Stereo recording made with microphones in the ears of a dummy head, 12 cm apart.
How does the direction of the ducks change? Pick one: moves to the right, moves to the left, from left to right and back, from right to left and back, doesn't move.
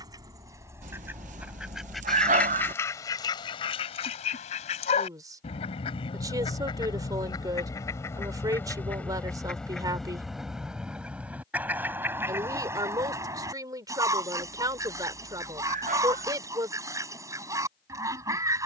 from right to left and back.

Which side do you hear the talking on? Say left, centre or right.
right.